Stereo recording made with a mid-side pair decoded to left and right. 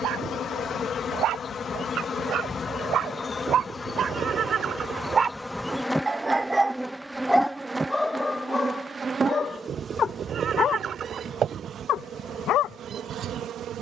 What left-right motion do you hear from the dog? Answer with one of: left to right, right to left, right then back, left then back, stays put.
right to left.